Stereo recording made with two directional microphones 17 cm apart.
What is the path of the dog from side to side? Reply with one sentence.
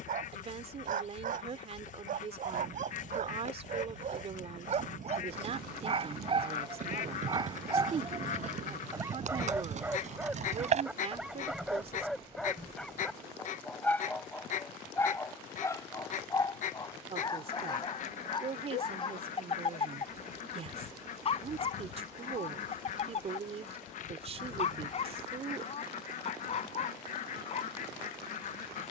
In this clip you hear the dog go from the right side to the left.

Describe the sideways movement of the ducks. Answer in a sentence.
You can hear the ducks stay in one place.